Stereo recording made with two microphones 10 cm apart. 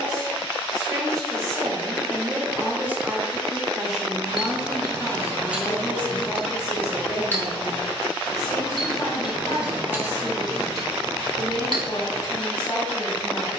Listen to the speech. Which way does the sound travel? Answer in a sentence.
In this clip you hear the speech travel towards the left.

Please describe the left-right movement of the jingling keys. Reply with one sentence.
In this clip you hear the jingling keys go left and come back.